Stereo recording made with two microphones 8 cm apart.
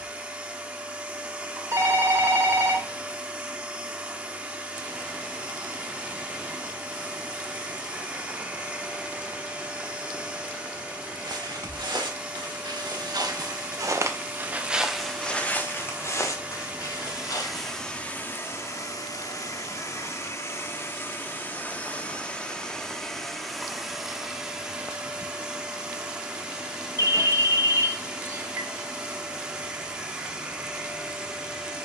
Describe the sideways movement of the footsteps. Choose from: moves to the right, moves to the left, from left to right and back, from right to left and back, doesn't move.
moves to the left.